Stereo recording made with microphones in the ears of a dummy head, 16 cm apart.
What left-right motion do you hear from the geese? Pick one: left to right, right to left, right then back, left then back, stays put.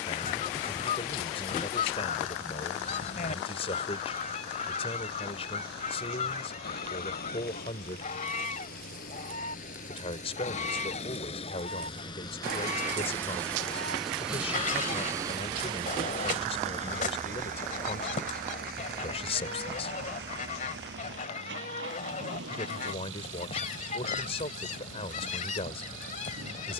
stays put.